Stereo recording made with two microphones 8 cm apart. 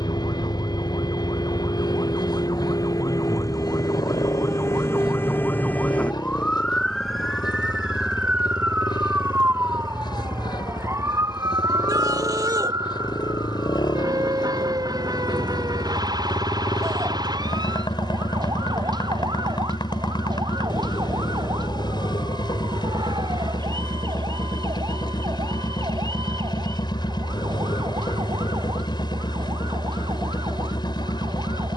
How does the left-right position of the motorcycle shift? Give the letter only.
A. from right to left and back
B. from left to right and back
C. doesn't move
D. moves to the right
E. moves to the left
C.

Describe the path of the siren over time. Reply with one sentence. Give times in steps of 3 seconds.
You can hear the siren on the left from 0 s, in the centre from 6 s and on the right from 9 s.